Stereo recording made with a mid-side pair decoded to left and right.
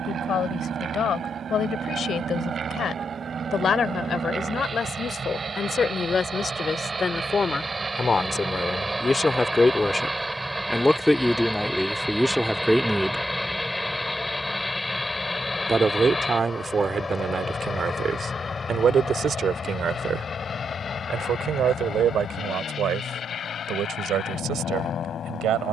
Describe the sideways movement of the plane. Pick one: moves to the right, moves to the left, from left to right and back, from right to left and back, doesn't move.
moves to the left.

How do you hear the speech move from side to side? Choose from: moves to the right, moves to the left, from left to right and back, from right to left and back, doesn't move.
moves to the right.